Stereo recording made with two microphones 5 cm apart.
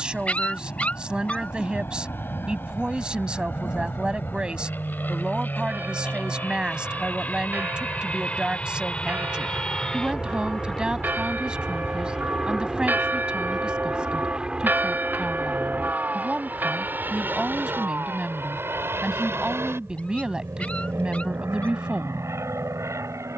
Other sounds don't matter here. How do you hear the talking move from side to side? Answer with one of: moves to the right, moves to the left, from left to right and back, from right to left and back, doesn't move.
doesn't move.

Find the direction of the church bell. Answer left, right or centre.
right.